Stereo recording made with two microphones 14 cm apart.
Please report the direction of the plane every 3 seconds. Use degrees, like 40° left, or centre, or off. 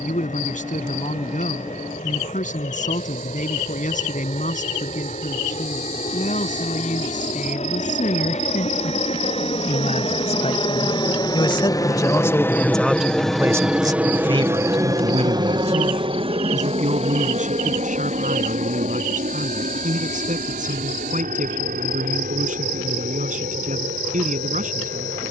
80° left, 70° left, 60° left, 40° left, centre, 40° right, 60° right, 70° right, 70° right.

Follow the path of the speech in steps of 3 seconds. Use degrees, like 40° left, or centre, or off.
70° left, 70° left, 70° left, 50° left, 10° right, 60° right, 70° right, 70° right, 70° right.